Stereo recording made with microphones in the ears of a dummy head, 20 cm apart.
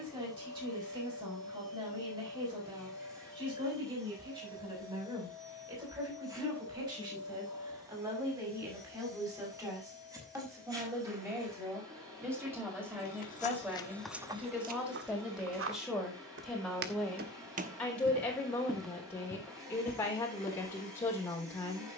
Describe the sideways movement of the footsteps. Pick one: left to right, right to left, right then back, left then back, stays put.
right then back.